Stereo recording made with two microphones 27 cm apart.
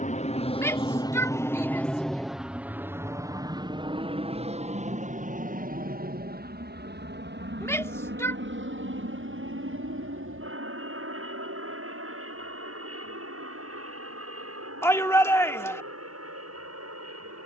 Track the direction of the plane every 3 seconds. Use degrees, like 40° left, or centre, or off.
10° left, 20° right, 40° right, 40° right, 50° right, 50° right.